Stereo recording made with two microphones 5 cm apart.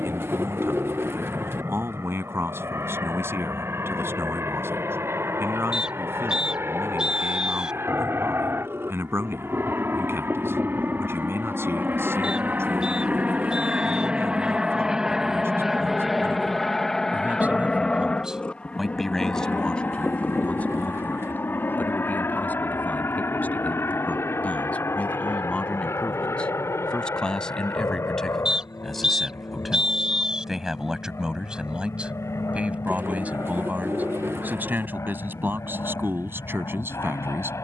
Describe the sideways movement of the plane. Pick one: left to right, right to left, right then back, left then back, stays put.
right to left.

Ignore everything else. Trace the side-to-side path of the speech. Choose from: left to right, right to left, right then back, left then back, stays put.
left then back.